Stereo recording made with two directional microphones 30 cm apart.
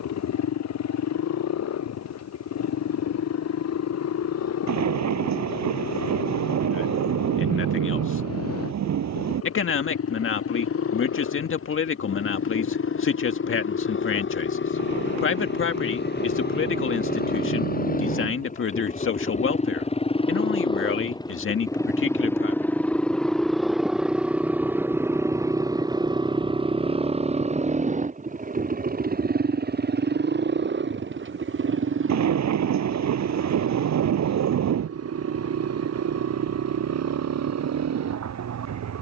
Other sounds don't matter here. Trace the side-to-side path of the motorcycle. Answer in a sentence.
You can hear the motorcycle move to the right.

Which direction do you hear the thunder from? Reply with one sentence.
You can hear the thunder on the right.